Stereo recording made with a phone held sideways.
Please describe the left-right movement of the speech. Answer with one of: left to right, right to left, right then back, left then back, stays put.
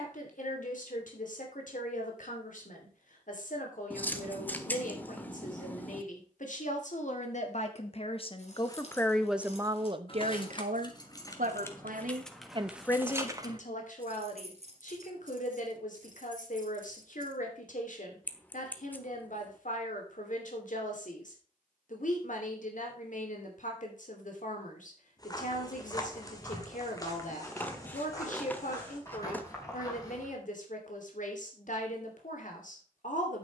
right then back.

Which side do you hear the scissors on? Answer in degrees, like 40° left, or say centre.
10° left.